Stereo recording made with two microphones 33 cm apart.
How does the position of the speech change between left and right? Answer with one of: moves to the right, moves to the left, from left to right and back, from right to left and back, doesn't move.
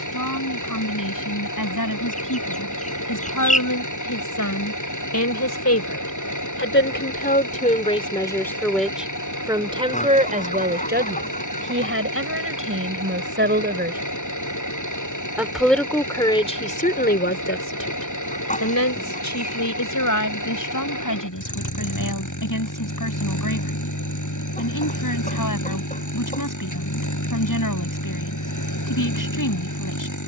from left to right and back.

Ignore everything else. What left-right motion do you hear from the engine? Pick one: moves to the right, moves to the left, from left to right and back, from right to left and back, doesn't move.
doesn't move.